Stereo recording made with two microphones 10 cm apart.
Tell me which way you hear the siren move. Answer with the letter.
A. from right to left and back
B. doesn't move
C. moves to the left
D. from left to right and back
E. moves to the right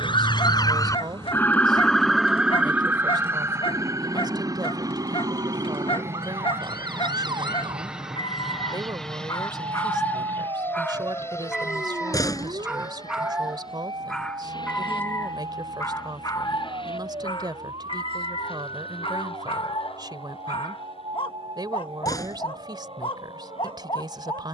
E.